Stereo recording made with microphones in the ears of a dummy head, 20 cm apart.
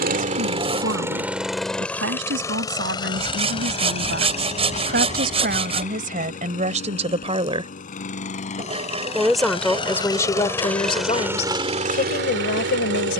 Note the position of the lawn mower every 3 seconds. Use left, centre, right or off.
centre, left, left, centre, right.